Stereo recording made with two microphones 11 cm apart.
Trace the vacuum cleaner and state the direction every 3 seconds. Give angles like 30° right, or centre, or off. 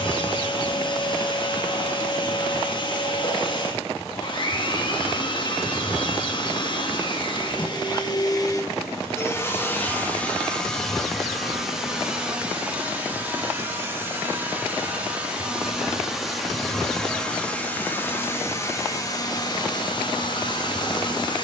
40° left, 40° left, 40° left, 10° left, 10° right, centre, 30° left.